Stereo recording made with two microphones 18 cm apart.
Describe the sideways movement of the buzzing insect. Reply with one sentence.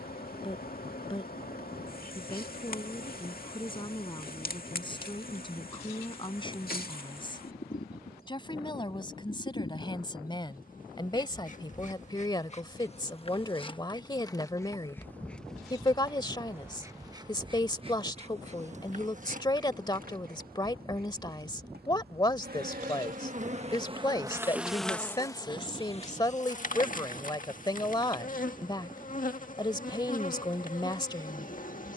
In this clip you hear the buzzing insect move from left to right and back again.